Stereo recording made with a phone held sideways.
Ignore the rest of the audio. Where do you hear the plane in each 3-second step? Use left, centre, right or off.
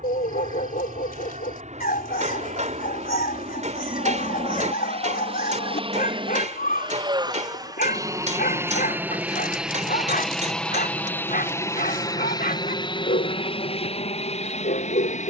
right, right, right, centre, left.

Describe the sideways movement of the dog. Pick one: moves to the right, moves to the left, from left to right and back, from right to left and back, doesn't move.
doesn't move.